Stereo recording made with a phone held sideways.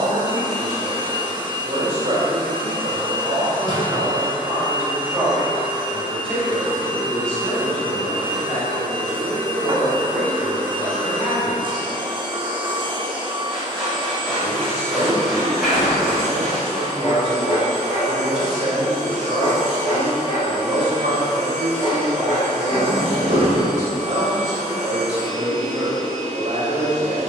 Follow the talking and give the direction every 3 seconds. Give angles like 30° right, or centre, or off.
50° right, 20° right, 10° left, 20° left, centre, 20° right, 50° right, 50° right, 50° right.